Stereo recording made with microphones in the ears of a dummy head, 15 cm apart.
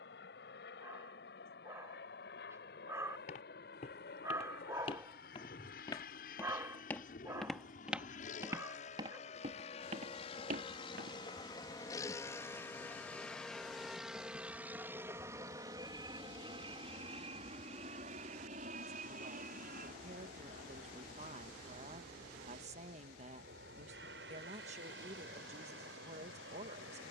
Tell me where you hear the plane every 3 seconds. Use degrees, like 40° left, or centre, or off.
70° left, 60° left, 50° left, 30° left, centre, 30° right, 50° right, 60° right, 60° right.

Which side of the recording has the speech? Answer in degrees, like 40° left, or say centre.
40° right.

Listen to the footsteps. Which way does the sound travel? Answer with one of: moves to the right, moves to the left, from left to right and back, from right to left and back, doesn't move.
moves to the right.